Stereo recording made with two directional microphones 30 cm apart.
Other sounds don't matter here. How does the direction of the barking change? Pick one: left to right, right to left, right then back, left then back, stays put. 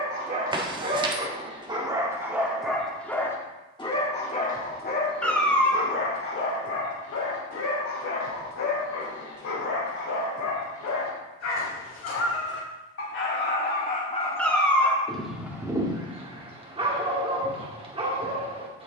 left then back.